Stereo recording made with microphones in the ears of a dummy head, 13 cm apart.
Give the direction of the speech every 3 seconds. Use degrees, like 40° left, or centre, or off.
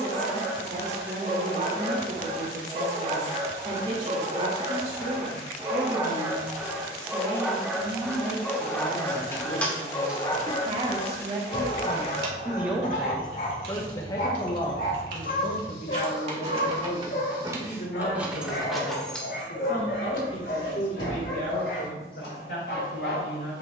60° right, 60° right, 60° right, 40° right, 10° left, 60° left, 80° left, 80° left.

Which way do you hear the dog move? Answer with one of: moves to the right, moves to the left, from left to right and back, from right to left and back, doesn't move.
moves to the left.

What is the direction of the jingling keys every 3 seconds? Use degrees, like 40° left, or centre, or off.
off, off, off, 10° right, 70° right, 40° right, 10° left, 30° left.